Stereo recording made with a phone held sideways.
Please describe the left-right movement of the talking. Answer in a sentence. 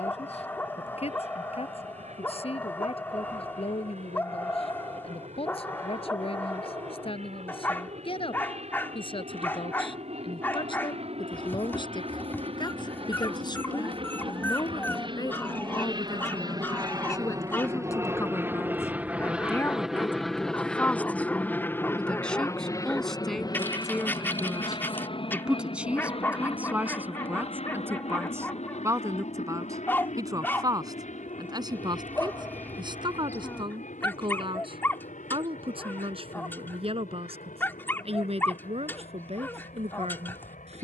In this clip you hear the talking move to the right.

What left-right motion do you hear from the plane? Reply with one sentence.
In this clip you hear the plane move to the left.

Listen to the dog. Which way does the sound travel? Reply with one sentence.
You can hear the dog stay in one place.